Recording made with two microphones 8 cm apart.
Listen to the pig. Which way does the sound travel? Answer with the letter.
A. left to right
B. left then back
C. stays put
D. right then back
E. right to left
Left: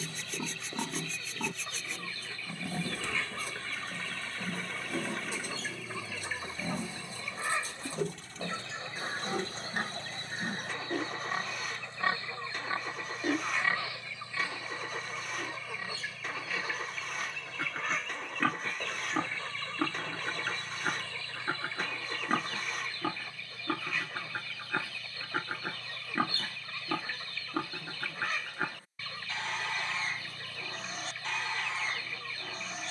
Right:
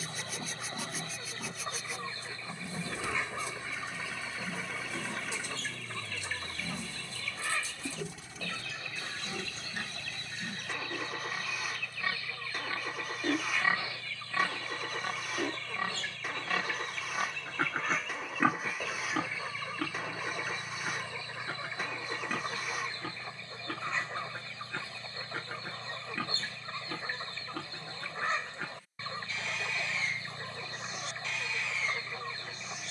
D.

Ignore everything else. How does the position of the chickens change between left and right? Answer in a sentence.
In this clip you hear the chickens go left and come back.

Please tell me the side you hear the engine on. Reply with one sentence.
In this clip you hear the engine in the centre.